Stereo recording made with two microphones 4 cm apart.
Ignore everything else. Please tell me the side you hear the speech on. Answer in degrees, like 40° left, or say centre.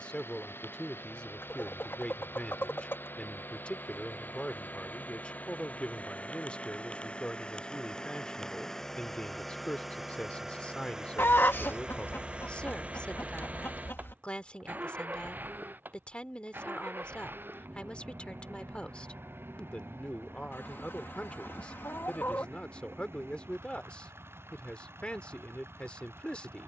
30° left.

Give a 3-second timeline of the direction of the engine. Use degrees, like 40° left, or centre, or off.
60° left, 40° left, 20° left, 10° right, 40° right, 50° right, 60° right, 70° right, 70° right.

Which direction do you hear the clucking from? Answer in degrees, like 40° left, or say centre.
60° left.